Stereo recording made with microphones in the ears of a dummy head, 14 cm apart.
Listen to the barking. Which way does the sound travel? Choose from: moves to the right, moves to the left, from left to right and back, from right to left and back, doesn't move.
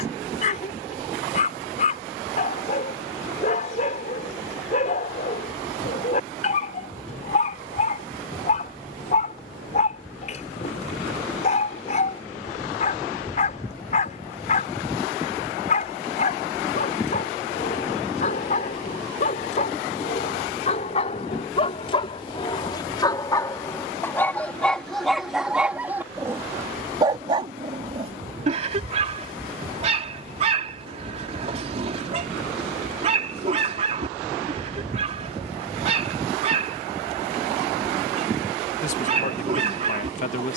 moves to the right.